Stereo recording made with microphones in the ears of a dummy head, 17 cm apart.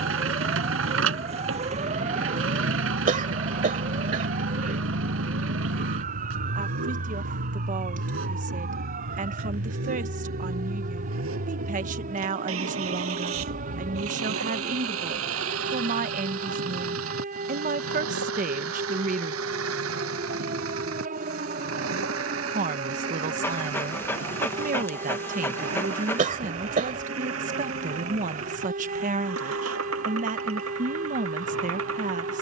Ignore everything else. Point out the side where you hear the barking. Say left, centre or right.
centre.